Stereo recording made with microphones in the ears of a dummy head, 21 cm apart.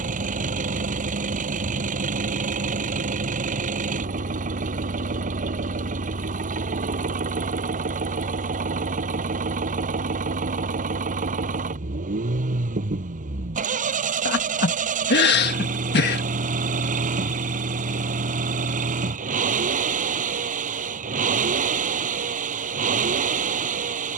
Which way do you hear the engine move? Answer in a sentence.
In this clip you hear the engine stay in one place.